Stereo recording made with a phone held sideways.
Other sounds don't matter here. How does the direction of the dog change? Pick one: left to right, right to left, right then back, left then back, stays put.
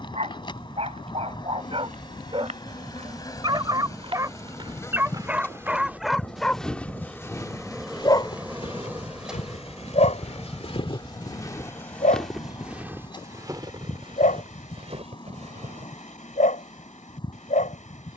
right to left.